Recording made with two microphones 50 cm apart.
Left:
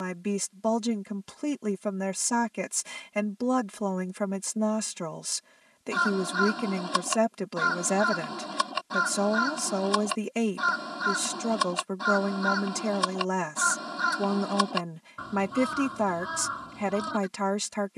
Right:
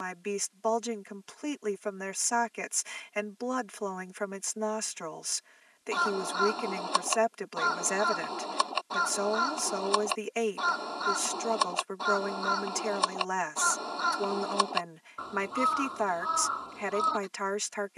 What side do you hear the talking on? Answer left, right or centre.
left.